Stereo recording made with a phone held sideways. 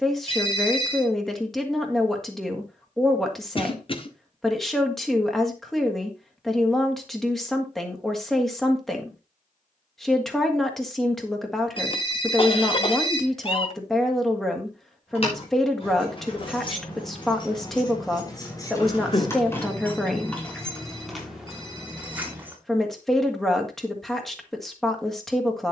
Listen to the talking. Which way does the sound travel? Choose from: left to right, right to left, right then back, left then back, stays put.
stays put.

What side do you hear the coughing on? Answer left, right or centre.
left.